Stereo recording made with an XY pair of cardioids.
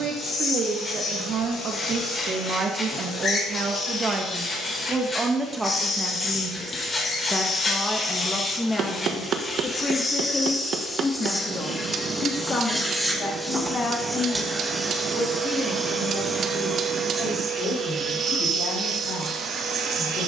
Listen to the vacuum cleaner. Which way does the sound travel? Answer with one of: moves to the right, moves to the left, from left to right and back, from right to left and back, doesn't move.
moves to the right.